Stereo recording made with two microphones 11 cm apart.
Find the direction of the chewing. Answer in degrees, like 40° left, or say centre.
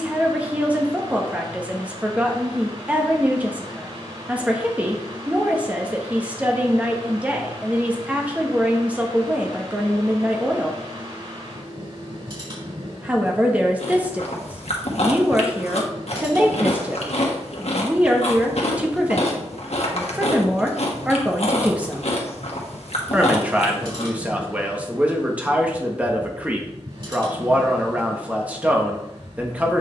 70° left.